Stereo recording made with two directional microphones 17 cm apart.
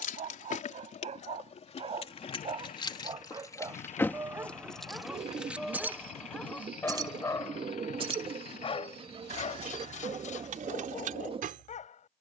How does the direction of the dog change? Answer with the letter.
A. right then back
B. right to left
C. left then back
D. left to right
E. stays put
B.